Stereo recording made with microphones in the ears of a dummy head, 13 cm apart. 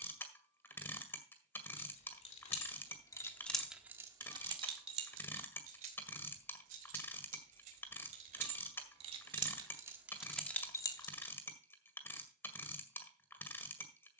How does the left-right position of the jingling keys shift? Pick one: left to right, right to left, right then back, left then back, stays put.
right then back.